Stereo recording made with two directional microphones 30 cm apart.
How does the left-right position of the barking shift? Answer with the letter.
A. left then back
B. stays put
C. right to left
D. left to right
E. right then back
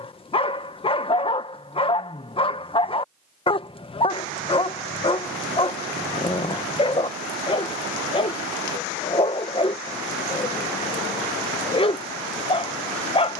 B.